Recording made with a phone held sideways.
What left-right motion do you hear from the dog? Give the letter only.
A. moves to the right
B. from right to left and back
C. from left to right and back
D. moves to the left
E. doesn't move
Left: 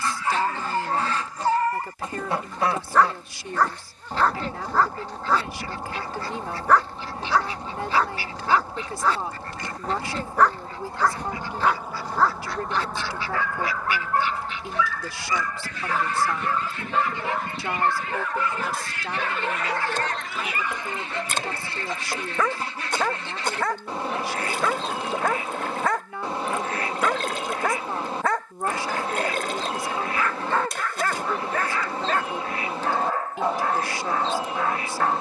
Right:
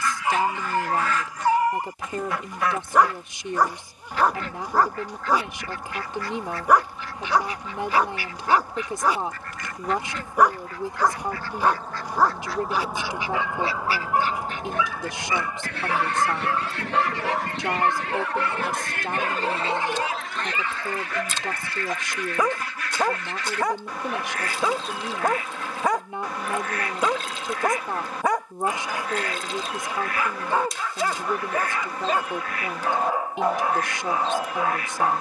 E.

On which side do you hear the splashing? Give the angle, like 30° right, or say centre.
60° left.